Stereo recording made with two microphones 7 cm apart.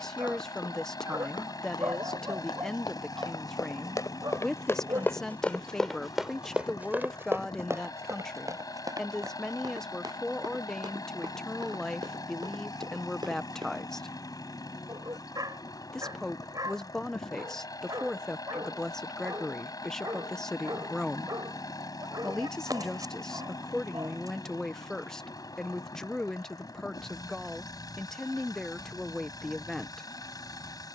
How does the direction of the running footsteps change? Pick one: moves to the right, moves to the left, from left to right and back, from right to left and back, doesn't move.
moves to the right.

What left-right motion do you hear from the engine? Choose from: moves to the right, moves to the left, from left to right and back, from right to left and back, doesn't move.
doesn't move.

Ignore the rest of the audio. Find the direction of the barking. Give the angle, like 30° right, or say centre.
60° right.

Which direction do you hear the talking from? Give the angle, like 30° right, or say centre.
10° left.